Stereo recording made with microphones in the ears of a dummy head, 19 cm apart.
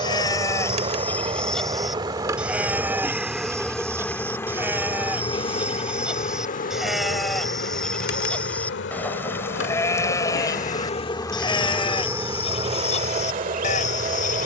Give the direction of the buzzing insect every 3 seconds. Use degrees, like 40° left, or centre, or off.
20° right, 10° left, 50° left, 40° left, 30° right.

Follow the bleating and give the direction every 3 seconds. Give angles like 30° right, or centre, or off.
10° left, 10° right, centre, 20° left, 30° left.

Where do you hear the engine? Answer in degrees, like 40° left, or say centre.
20° right.